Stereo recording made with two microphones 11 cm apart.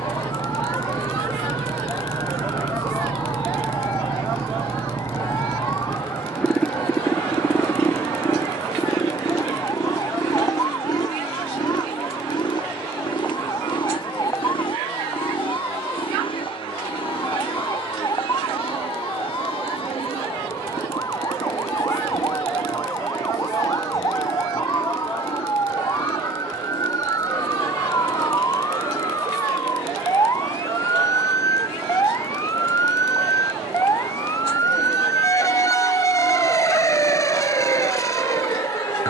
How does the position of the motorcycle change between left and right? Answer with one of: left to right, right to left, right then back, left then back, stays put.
right to left.